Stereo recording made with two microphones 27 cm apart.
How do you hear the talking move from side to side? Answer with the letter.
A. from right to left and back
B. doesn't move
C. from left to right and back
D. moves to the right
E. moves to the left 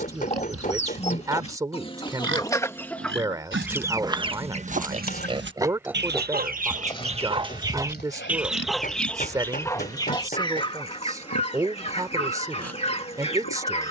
B.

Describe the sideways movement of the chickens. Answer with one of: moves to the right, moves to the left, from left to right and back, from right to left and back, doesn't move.
from left to right and back.